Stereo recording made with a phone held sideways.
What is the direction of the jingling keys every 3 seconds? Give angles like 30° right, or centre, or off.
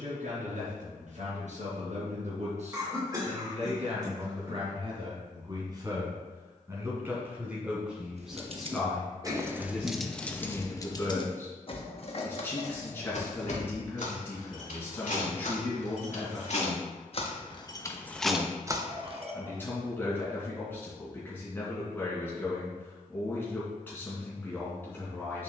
off, off, 50° right, 10° left, 60° left, 50° left, 20° right, off, off.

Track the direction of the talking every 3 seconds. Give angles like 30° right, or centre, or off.
60° right, 40° right, 10° right, 10° left, 10° left, 10° left, 10° left, 10° left, 10° left.